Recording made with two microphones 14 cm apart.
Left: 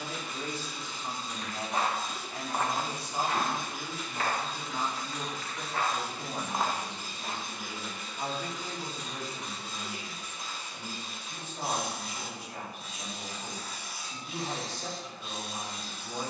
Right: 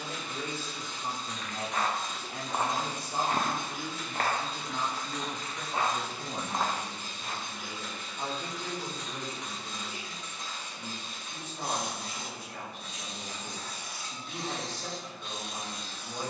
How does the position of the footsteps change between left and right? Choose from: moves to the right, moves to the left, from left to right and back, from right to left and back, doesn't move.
from left to right and back.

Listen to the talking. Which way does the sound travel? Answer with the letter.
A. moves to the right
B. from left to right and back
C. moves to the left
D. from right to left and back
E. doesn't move
C.